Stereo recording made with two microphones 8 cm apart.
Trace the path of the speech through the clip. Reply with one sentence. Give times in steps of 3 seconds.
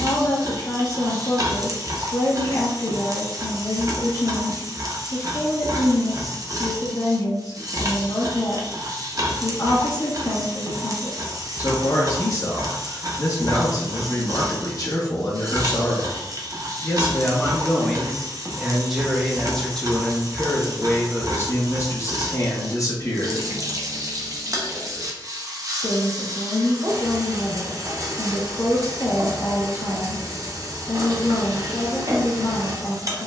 In this clip you hear the speech on the left from 0 s, in the centre from 18 s and on the left from 21 s.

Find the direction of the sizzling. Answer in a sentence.
In this clip you hear the sizzling on the right.